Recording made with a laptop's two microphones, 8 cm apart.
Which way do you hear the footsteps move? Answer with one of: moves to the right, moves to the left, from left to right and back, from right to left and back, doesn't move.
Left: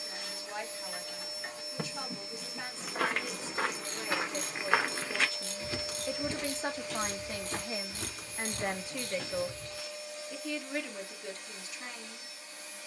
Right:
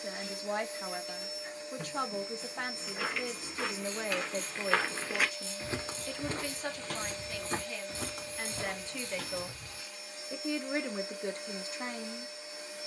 moves to the right.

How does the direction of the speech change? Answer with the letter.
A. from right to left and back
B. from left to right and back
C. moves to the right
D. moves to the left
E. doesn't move
A.